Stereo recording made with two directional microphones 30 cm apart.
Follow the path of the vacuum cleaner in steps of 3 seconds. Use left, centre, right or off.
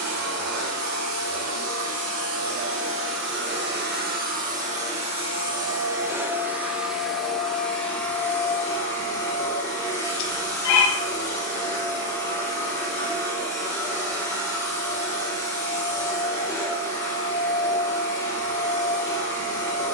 right, right, centre, centre, centre, centre, centre.